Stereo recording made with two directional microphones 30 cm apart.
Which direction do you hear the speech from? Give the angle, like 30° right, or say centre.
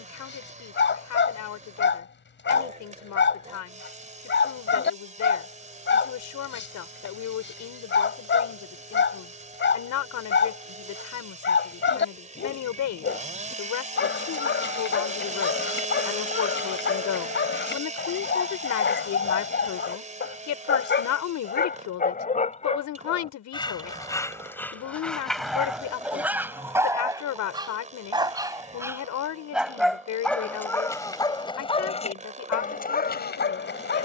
70° left.